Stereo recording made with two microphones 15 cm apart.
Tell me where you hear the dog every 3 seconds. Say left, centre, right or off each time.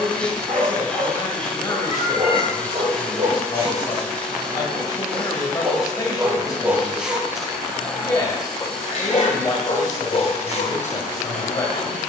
right, right, centre, left.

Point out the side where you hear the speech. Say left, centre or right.
left.